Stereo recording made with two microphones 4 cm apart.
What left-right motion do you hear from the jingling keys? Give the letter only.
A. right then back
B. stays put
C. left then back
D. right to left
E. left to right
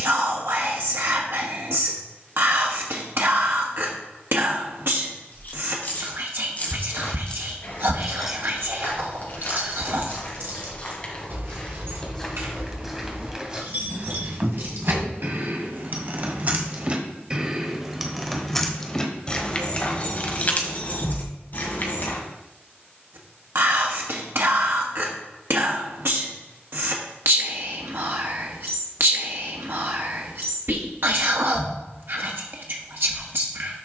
A.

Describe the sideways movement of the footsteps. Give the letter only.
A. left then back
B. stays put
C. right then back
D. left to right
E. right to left
D.